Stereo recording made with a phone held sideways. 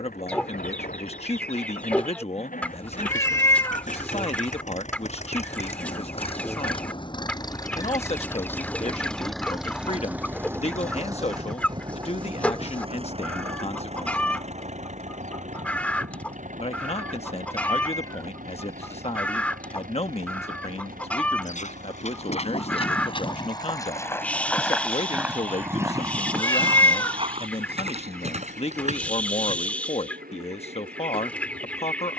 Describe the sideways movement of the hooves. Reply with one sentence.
You can hear the hooves travel towards the right.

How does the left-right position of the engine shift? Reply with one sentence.
You can hear the engine move from left to right.